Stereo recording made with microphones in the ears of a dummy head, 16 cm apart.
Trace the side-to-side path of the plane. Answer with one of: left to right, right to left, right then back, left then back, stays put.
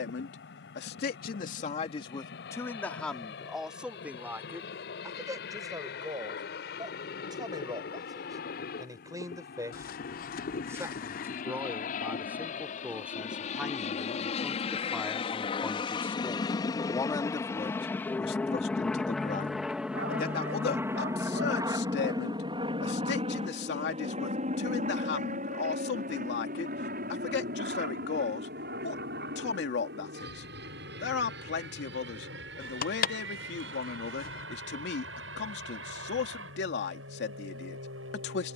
left to right.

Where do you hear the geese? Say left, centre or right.
left.